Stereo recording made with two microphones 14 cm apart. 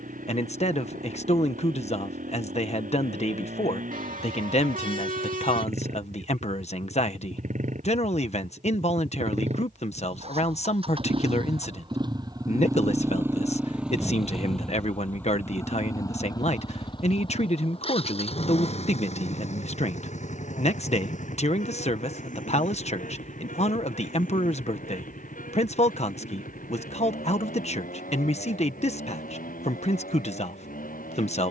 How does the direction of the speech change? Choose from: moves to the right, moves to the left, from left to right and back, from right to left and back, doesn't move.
doesn't move.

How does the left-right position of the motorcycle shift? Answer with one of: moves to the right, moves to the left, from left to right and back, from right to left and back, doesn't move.
moves to the left.